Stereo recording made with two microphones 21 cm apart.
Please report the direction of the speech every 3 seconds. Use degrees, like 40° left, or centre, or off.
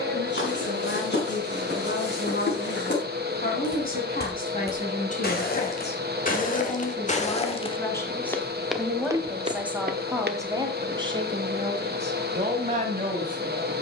60° left, 40° left, 20° left, 20° right, 40° right.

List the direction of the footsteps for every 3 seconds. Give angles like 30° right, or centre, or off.
60° left, 50° left, 20° left, 40° right, off.